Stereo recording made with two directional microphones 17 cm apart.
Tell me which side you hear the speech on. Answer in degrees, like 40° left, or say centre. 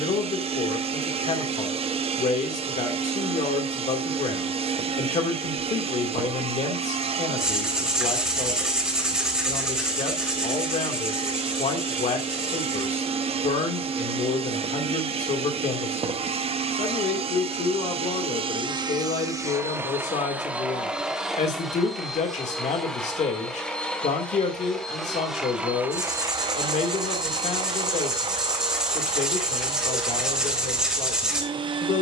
40° left.